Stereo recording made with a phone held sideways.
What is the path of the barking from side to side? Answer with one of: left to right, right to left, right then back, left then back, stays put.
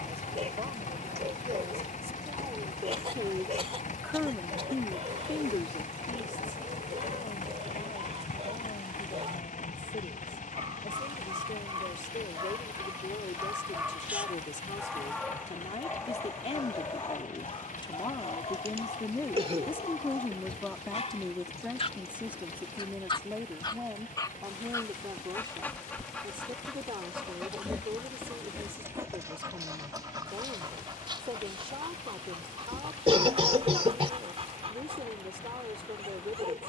left then back.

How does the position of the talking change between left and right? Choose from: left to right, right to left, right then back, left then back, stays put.
left then back.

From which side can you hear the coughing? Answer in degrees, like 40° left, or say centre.
40° right.